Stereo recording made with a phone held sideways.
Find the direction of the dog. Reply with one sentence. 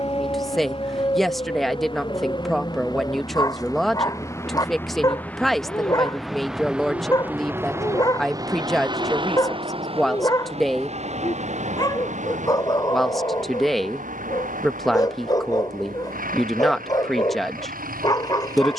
In this clip you hear the dog on the left.